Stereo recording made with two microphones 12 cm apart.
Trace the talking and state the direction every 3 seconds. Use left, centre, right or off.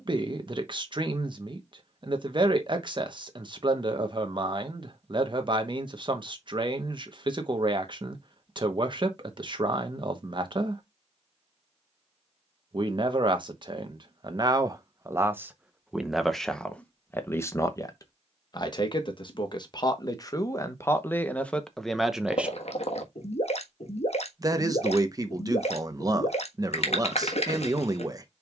right, right, right, right, right, centre, left, centre, right, right.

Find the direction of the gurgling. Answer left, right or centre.
left.